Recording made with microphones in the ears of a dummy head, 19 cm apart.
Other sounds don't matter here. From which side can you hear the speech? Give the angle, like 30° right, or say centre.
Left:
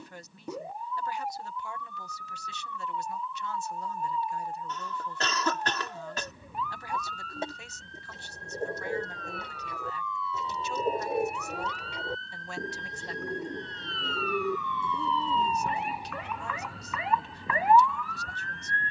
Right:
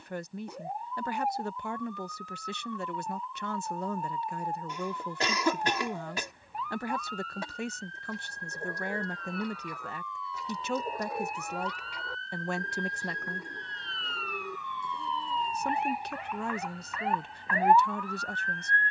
50° right.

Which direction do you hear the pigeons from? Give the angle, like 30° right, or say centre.
20° left.